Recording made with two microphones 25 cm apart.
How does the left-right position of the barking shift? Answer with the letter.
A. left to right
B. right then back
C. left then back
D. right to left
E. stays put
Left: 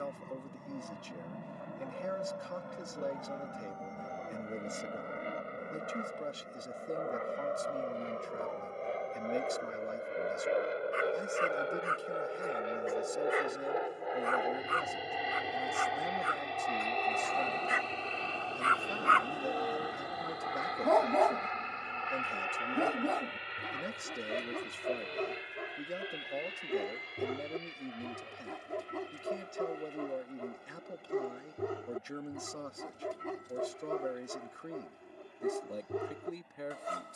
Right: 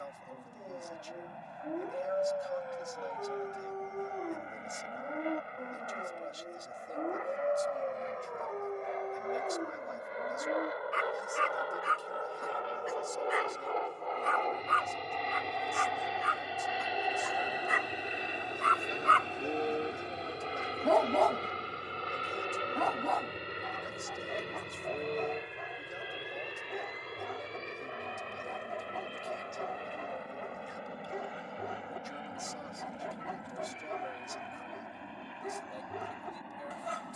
D.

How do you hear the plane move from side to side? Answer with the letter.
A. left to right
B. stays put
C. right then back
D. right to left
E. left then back
A.